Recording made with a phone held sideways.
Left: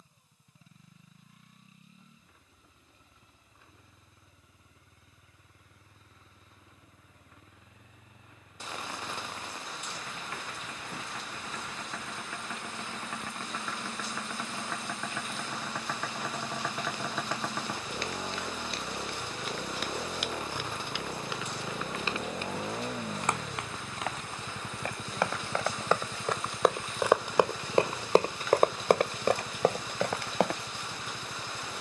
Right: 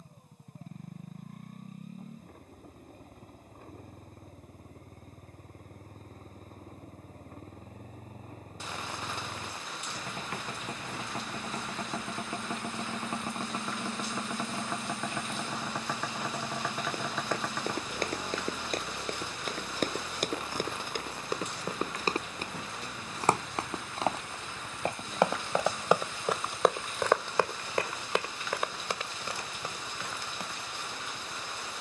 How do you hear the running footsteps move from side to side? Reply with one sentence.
In this clip you hear the running footsteps travel towards the left.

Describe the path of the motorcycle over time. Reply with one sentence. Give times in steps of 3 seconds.
You can hear the motorcycle on the right from 0 s, in the centre from 15 s and on the left from 18 s.